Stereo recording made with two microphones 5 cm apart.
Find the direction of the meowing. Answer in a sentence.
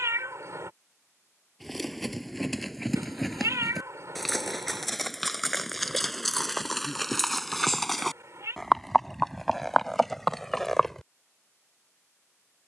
In this clip you hear the meowing on the right.